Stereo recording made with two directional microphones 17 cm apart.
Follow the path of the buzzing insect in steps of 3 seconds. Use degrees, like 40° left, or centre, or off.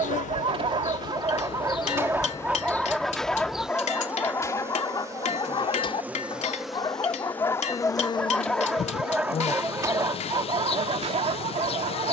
30° left, 10° right, 10° left, 30° left.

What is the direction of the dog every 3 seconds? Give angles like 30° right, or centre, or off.
20° right, 20° left, 20° left, 30° right.